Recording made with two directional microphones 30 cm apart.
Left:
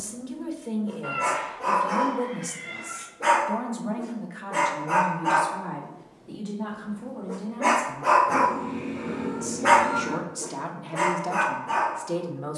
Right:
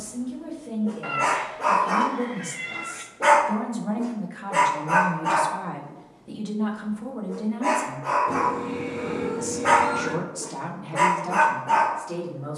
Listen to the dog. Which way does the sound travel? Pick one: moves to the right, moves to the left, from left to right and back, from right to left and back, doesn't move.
from right to left and back.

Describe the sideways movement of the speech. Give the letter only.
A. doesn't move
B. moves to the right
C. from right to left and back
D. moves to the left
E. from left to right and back
E.